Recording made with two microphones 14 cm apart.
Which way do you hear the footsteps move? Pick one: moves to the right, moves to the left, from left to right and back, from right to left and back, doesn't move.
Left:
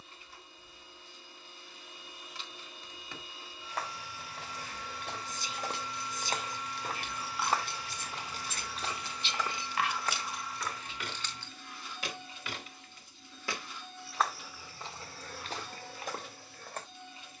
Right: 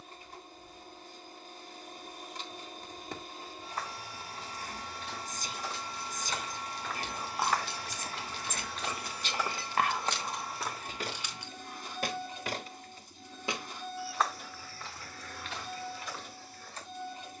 from left to right and back.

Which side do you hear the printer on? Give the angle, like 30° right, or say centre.
40° right.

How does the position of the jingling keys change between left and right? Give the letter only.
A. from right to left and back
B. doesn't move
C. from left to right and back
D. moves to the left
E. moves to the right
E.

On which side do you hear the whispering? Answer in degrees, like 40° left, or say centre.
40° right.